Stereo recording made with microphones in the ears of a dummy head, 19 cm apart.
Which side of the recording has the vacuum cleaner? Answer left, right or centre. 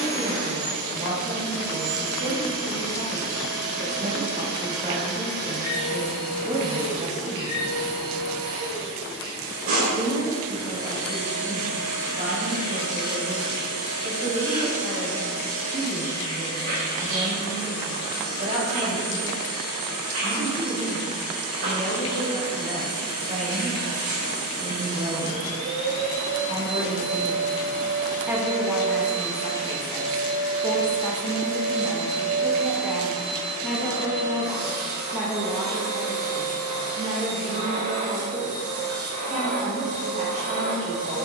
right.